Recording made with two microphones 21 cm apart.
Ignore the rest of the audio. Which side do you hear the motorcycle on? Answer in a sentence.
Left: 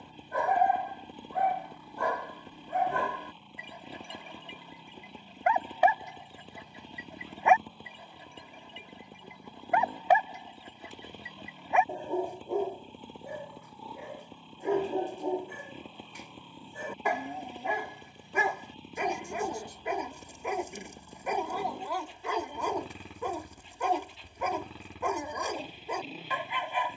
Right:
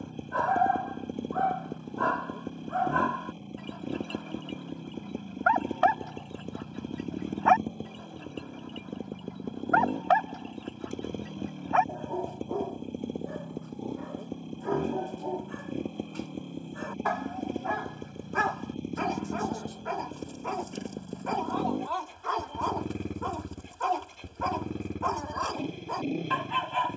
You can hear the motorcycle on the right.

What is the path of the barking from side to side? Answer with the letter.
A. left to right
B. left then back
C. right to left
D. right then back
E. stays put
E.